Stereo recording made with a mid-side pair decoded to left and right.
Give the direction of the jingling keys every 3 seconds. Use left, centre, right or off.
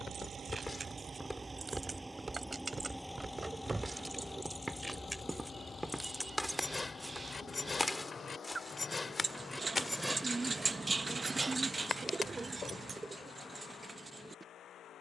right, centre, left, centre, right.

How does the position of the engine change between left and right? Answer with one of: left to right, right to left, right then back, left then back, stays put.
right to left.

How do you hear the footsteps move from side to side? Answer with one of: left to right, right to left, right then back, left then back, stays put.
right then back.